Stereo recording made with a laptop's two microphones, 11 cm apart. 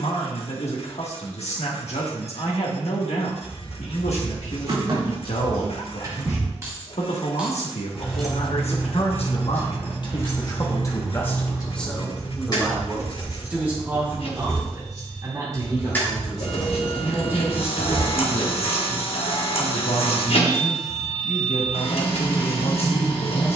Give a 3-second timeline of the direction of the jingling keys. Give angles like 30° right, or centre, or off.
off, 50° right, 10° right, 30° left, 40° left, 10° left, off, off.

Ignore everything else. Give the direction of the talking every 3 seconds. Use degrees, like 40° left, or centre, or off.
80° left, 80° left, 80° left, 40° left, 10° right, 30° right, 50° left, 70° left.